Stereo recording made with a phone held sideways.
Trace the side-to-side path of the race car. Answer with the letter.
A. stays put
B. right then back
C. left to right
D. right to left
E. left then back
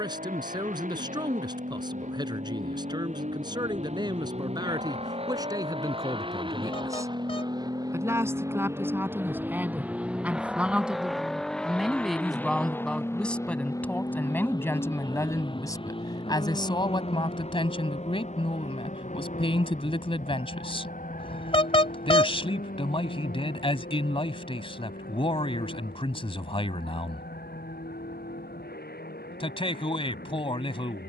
D.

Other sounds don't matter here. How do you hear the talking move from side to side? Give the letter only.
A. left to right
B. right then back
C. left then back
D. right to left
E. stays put
D.